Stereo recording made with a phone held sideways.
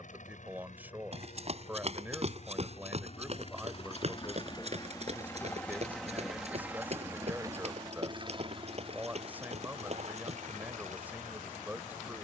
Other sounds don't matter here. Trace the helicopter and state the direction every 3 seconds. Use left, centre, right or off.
left, left, right, right.